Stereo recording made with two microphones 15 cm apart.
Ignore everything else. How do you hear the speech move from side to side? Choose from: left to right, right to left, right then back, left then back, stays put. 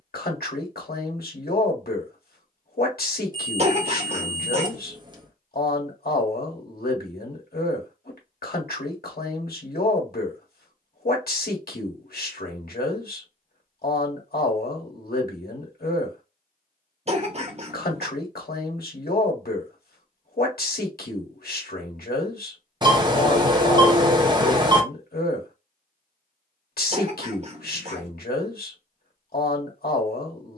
stays put.